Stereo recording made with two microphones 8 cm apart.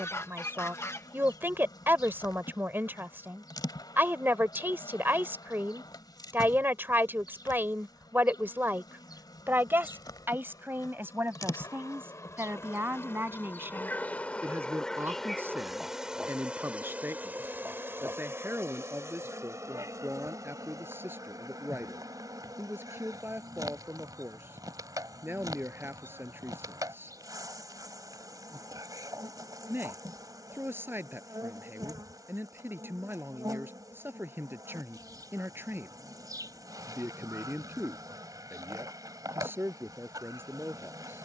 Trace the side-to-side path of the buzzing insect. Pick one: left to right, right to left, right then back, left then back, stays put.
left to right.